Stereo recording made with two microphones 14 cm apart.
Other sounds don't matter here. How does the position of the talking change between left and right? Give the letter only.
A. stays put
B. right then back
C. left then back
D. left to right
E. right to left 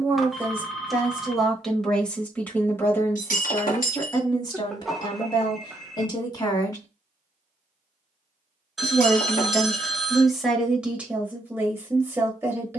C.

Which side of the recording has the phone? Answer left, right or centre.
centre.